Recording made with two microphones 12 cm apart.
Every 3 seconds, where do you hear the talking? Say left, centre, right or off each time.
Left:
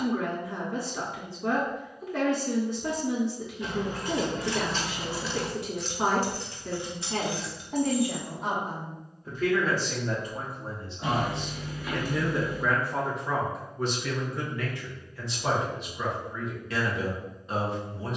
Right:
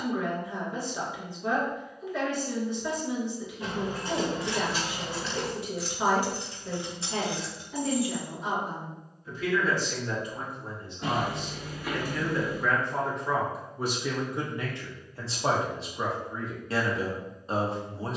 left, left, left, left, centre, right.